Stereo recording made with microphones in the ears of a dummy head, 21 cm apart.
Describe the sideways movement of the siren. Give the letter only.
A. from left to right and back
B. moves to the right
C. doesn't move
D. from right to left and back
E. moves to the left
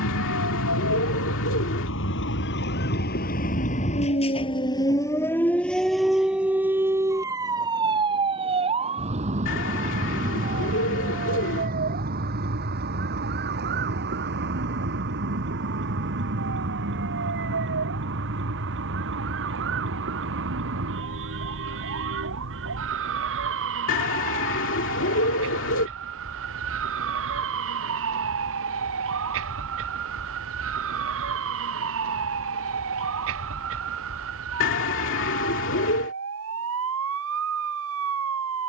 B.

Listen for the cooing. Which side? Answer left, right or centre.
left.